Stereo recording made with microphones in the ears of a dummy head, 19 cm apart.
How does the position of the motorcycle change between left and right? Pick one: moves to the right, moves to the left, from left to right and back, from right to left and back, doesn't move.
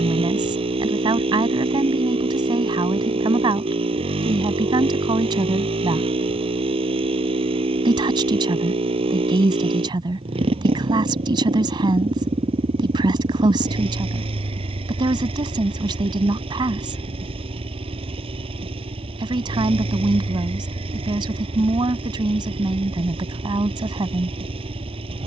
doesn't move.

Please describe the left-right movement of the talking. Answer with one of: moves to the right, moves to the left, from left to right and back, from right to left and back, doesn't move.
doesn't move.